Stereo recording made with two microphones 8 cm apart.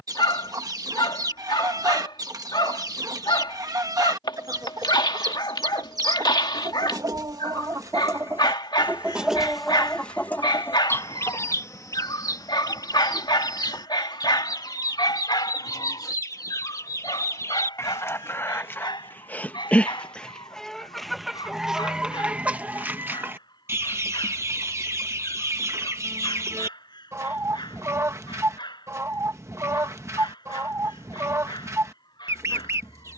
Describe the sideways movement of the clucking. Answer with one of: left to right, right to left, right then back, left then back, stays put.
left then back.